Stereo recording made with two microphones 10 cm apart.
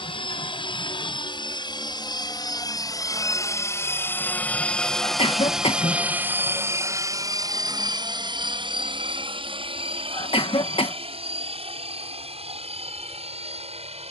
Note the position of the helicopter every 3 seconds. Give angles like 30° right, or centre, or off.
50° left, 10° left, 40° right, 60° right, 70° right.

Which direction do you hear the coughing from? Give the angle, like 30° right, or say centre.
60° left.